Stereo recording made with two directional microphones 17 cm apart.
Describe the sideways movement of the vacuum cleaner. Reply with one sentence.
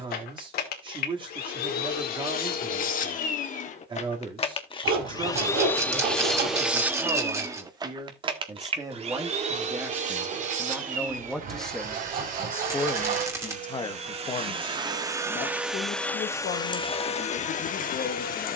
You can hear the vacuum cleaner go right and come back.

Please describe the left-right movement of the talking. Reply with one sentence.
You can hear the talking move from right to left.